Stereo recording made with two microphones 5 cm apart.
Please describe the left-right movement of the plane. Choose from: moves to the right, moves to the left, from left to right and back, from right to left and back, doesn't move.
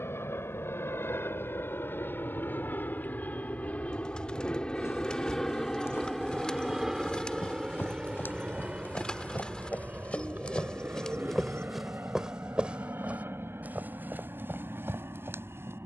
moves to the right.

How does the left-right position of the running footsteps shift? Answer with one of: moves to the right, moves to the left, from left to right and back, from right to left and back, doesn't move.
moves to the right.